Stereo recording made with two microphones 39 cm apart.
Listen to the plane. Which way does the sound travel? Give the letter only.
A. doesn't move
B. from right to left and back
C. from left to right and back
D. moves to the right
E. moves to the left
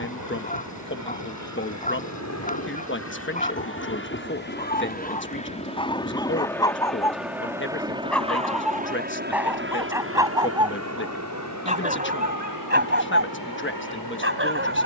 D.